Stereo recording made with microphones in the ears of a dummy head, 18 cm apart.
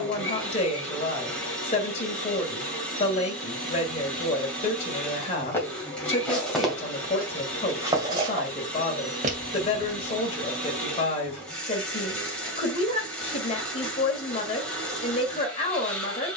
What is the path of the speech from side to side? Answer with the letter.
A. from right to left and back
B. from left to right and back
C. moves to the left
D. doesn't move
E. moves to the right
D.